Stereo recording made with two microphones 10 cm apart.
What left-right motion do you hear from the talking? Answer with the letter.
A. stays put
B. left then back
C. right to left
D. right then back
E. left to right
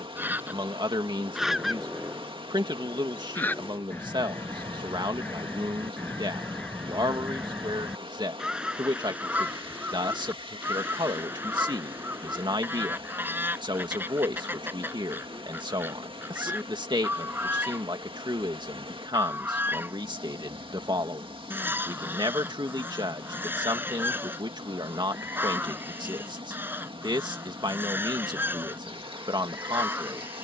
A.